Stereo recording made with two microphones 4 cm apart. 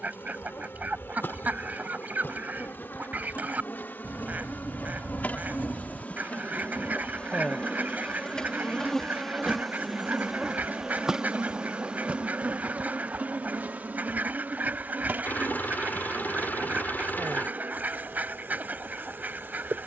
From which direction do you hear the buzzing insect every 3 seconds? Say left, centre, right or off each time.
left, left, left, centre, right, right, right.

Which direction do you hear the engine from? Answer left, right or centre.
left.